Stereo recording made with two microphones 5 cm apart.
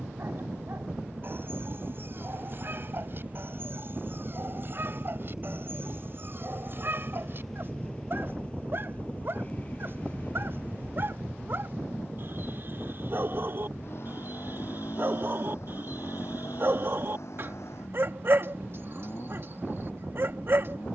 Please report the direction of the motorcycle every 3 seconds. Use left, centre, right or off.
right, right, centre, left, left, left, left.